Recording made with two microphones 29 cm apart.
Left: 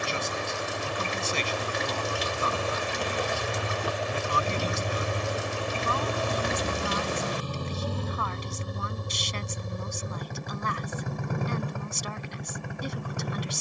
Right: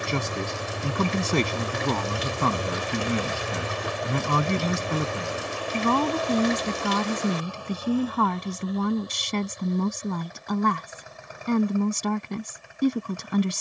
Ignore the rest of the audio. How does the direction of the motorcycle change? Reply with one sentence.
In this clip you hear the motorcycle travel towards the left.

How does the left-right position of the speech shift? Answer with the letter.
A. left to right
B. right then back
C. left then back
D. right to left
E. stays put
E.